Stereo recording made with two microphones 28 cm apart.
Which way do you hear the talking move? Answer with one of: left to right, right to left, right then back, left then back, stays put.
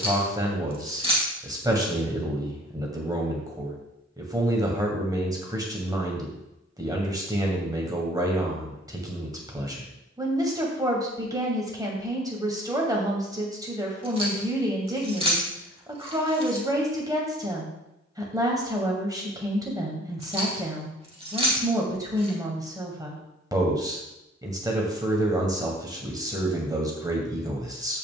stays put.